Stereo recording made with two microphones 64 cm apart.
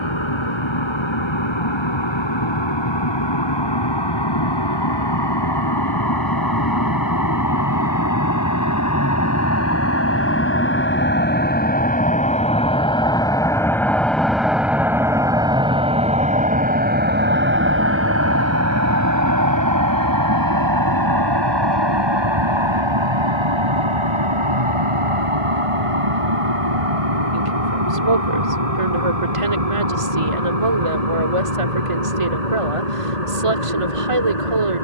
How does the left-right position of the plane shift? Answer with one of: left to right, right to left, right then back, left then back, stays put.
left to right.